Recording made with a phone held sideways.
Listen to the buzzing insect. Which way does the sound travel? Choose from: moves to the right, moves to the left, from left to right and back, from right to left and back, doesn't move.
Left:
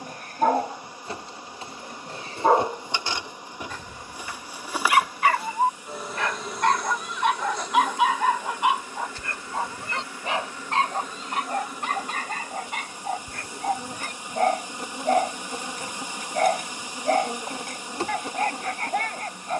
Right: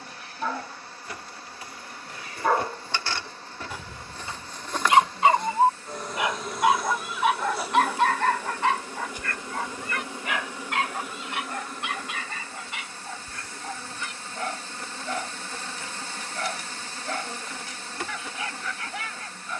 from left to right and back.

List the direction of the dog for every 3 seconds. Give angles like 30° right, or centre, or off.
40° left, 20° right, centre, 30° left, 50° left, 50° left, 50° left.